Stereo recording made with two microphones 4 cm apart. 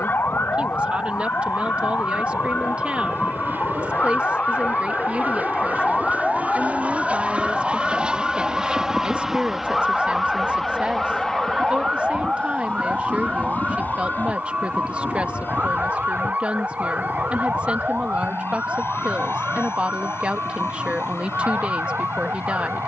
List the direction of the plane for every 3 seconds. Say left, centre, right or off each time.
right, right, right, centre, left, left, left, left.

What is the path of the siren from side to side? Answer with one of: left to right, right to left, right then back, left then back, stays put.
left to right.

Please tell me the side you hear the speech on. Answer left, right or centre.
right.